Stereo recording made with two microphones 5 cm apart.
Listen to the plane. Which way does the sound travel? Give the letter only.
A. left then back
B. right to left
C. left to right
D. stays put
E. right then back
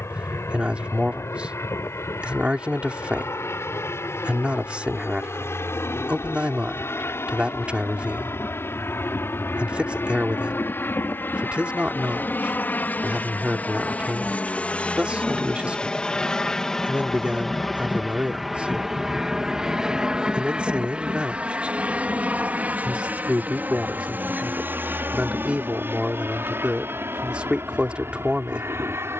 C.